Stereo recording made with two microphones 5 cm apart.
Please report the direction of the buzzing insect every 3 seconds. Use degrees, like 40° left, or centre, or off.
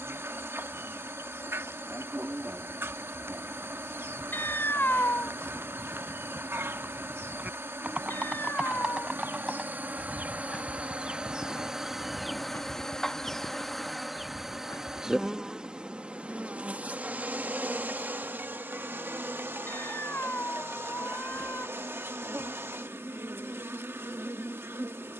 60° right, 60° right, 50° right, 30° right, centre, 30° right, 50° right, 50° right, 50° right.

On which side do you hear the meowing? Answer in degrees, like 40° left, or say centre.
50° left.